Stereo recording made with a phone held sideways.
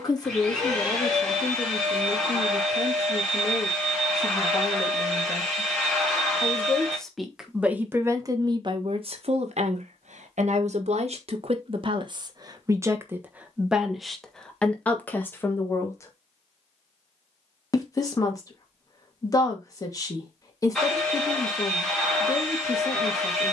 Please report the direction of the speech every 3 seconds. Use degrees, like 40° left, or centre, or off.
30° left, 30° left, 10° right, 60° right, 10° right, 20° left, 30° left, 30° left.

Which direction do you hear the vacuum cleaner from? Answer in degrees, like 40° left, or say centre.
centre.